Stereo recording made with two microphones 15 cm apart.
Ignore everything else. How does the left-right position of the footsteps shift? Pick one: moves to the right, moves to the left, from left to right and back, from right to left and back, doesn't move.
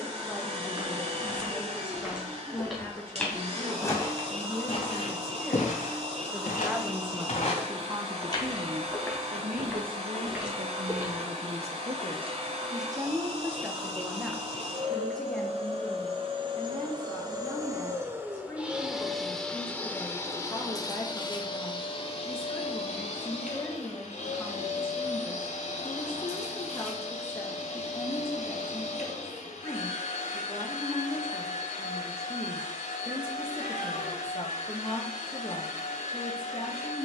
from right to left and back.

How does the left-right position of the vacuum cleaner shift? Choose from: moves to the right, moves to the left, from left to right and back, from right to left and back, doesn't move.
moves to the left.